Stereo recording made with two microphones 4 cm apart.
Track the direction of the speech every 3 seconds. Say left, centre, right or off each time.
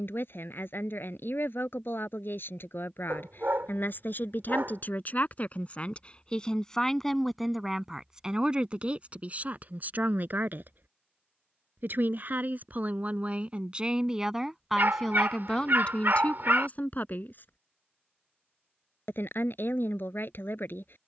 left, left, centre, right, right, left, left.